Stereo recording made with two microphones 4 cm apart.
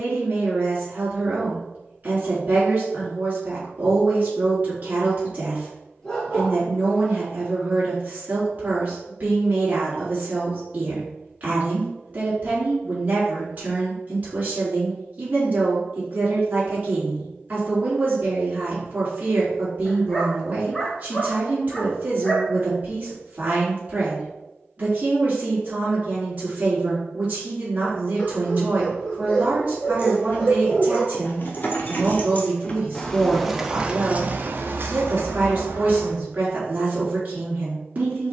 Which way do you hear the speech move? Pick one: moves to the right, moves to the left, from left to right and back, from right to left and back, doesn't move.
doesn't move.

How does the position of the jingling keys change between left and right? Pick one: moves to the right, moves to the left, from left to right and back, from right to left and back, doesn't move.
moves to the right.